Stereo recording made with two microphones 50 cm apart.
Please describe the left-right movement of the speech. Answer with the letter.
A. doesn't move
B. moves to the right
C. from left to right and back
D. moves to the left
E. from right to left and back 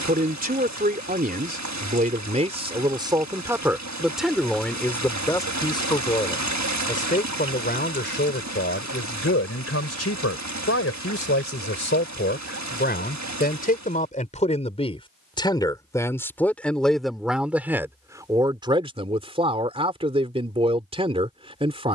E.